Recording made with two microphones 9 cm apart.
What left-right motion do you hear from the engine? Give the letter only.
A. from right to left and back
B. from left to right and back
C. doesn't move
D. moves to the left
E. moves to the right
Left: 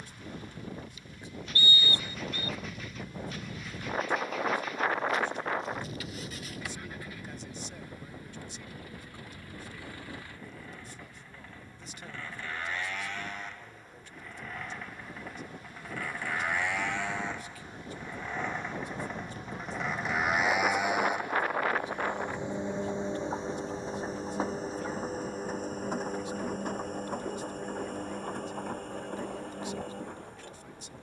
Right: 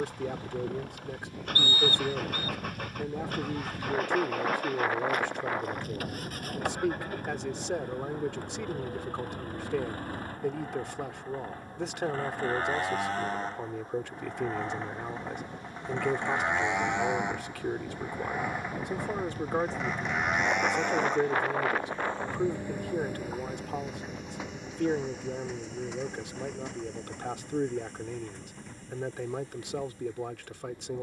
D.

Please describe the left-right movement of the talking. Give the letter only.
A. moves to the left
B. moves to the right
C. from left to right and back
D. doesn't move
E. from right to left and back
D.